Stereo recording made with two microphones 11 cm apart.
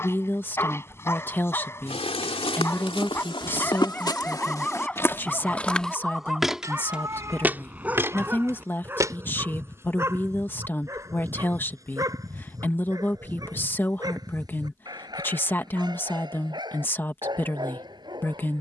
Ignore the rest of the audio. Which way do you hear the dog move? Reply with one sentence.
In this clip you hear the dog move from left to right.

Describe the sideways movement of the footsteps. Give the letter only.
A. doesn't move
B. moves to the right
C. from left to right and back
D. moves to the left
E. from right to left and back
B.